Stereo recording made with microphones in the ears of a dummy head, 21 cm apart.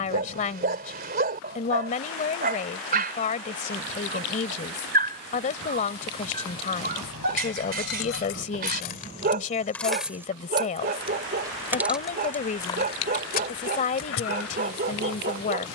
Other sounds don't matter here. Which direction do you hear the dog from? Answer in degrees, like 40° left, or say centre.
40° right.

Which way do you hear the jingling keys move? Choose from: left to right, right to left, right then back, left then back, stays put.
right then back.